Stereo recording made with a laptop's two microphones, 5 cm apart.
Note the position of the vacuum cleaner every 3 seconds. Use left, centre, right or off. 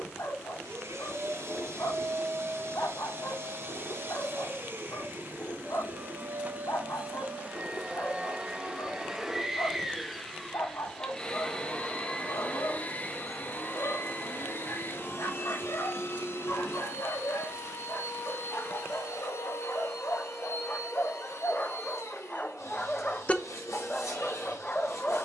right, right, right, centre, left, left, left, left, left.